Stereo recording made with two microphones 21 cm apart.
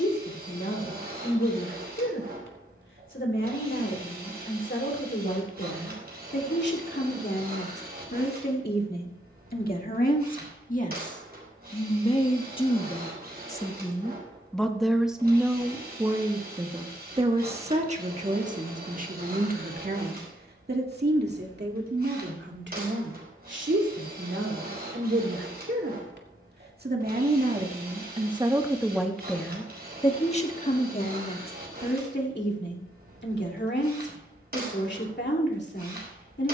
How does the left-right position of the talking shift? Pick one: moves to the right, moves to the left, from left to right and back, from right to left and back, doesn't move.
from left to right and back.